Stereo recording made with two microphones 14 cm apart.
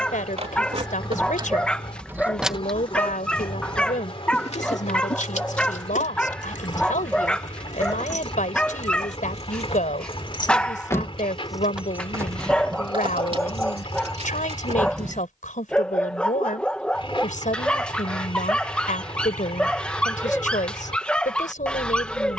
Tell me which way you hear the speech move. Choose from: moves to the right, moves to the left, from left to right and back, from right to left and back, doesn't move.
doesn't move.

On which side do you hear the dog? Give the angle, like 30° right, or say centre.
10° left.